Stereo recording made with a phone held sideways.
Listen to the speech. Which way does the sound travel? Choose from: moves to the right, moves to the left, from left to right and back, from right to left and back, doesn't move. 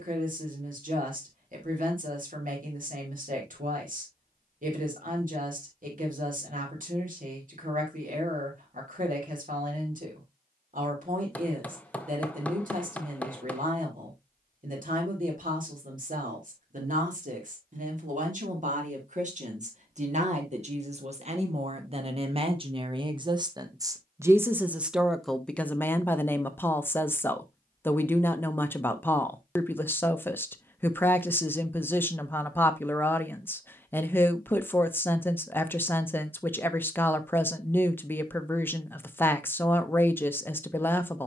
moves to the left.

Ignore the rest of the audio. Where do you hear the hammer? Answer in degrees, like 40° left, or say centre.
10° left.